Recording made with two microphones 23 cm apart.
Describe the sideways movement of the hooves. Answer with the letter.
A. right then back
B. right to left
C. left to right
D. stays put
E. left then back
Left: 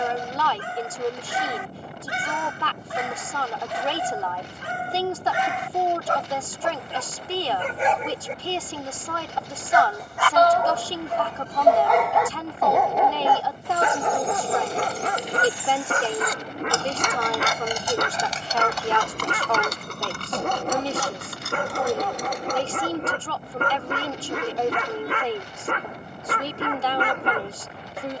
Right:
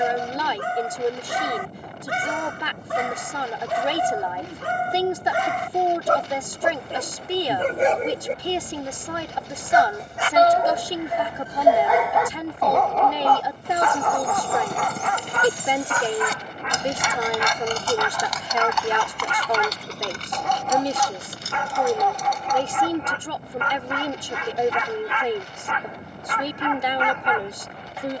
B.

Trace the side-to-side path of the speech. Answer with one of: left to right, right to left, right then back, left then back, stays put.
stays put.